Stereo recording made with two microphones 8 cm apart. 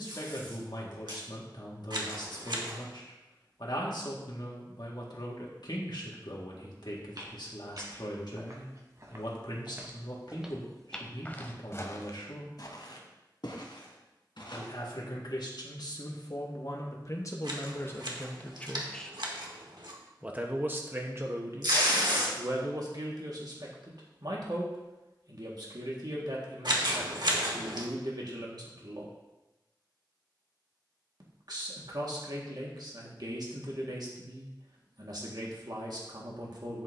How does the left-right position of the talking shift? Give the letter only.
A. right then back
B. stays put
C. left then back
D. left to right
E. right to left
D.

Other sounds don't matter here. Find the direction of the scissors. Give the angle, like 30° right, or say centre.
60° right.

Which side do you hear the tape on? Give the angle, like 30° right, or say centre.
70° right.